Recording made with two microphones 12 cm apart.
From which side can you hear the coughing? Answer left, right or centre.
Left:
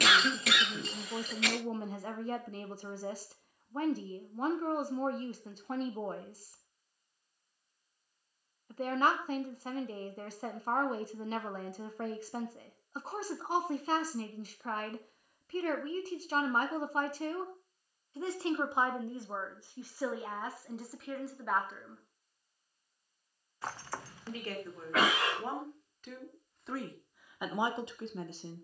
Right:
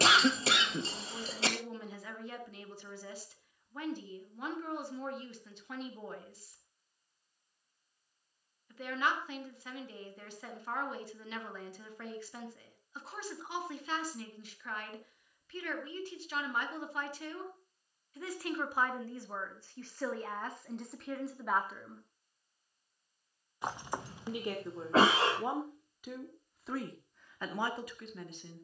right.